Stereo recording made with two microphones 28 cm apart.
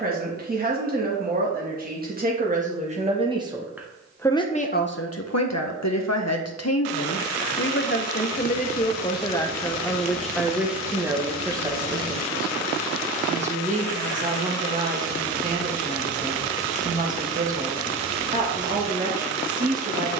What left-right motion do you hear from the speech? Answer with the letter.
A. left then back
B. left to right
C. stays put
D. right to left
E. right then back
A.